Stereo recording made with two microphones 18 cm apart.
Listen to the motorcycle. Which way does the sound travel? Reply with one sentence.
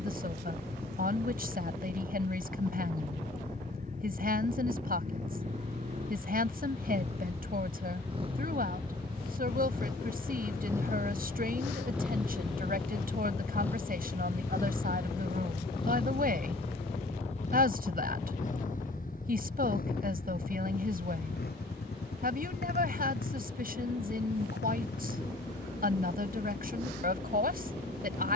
You can hear the motorcycle travel towards the left.